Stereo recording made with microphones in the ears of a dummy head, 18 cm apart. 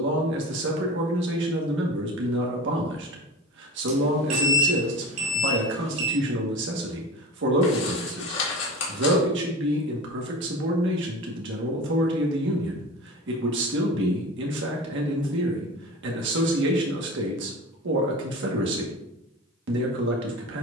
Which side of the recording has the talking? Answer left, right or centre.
right.